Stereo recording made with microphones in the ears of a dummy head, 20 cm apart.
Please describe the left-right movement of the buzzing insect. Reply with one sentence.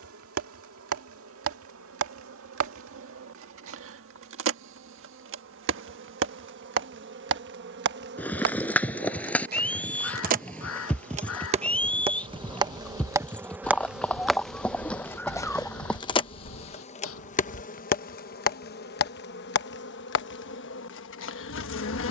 You can hear the buzzing insect go from the right side to the left.